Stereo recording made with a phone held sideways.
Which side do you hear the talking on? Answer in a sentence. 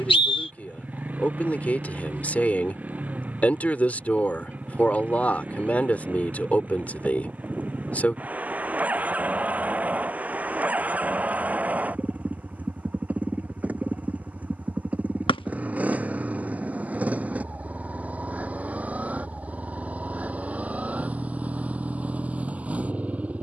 You can hear the talking in the centre.